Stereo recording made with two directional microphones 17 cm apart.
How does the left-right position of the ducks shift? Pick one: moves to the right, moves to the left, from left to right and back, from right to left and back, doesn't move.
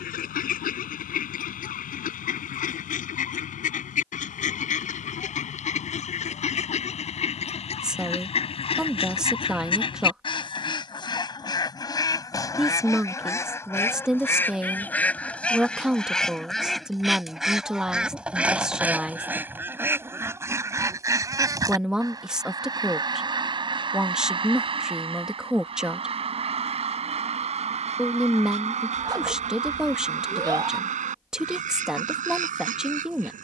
moves to the right.